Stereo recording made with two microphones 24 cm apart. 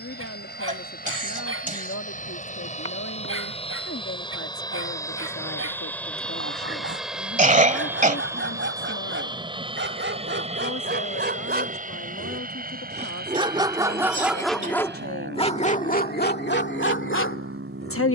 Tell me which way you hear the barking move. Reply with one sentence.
You can hear the barking move from right to left.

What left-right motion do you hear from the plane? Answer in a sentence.
In this clip you hear the plane move to the right.